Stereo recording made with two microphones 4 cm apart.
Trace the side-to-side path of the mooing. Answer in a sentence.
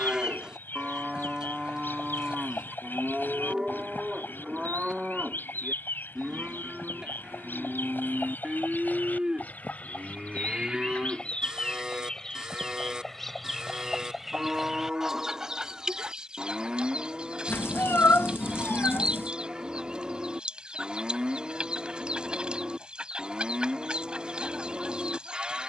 You can hear the mooing stay put.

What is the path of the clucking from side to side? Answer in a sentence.
You can hear the clucking travel towards the right.